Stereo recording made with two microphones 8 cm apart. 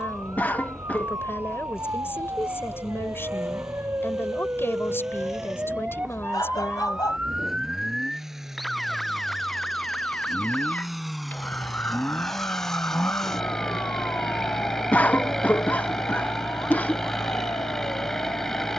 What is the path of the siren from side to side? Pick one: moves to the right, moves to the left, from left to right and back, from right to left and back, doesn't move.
moves to the left.